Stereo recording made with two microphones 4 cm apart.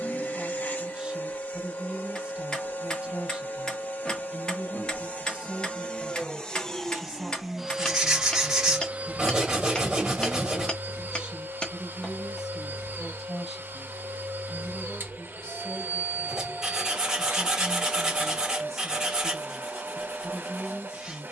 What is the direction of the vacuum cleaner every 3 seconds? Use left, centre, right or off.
left, left, centre, right, right, right, right.